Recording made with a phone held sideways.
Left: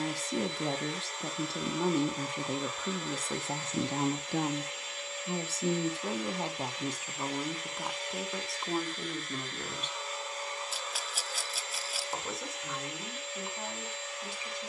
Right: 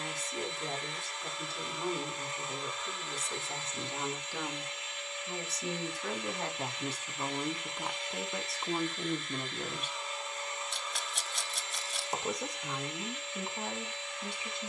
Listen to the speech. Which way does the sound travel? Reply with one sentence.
In this clip you hear the speech move to the right.